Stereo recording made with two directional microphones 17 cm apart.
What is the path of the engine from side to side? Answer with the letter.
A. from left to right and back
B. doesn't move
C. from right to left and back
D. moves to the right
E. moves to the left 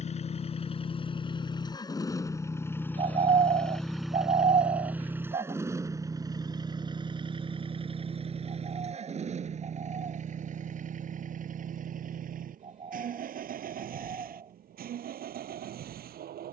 D.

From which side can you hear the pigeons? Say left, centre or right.
right.